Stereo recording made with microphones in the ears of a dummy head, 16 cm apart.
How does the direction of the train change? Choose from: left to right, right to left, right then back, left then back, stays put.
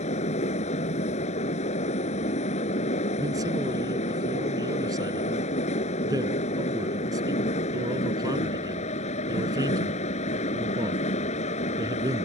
stays put.